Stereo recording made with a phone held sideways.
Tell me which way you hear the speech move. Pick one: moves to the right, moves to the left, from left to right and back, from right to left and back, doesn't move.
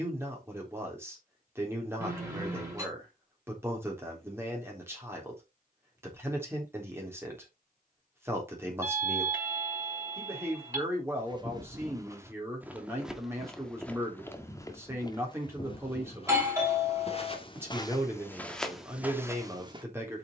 doesn't move.